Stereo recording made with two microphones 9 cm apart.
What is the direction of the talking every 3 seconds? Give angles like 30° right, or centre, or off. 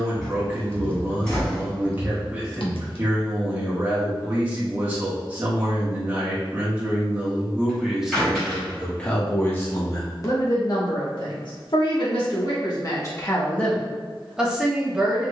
20° right, 20° right, 10° right, 40° left, 20° left.